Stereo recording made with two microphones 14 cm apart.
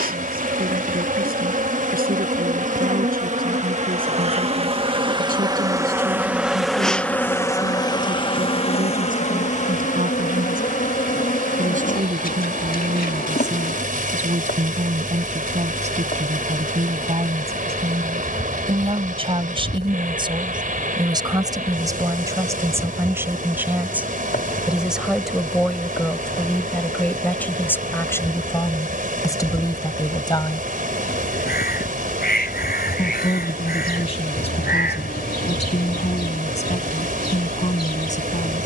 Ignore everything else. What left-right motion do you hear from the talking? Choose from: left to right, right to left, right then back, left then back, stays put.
right to left.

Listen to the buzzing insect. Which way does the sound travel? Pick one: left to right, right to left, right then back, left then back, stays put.
right to left.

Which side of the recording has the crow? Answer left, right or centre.
left.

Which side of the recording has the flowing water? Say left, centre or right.
right.